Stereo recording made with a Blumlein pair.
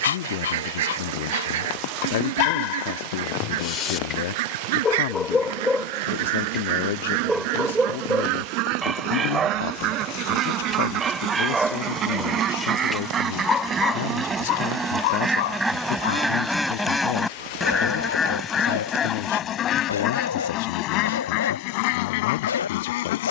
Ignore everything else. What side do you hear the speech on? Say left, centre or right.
left.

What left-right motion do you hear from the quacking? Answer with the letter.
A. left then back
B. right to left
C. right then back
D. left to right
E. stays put
B.